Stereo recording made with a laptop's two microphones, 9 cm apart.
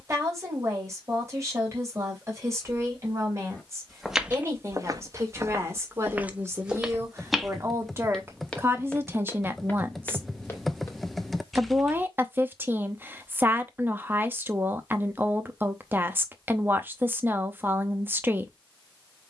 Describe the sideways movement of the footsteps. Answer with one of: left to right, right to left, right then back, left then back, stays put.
right then back.